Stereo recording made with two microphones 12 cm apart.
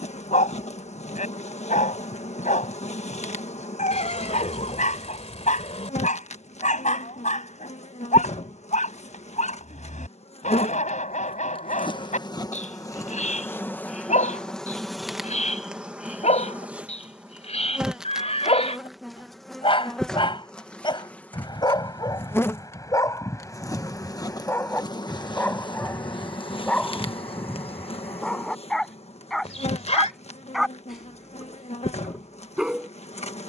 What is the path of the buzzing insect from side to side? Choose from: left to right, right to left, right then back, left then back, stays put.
right then back.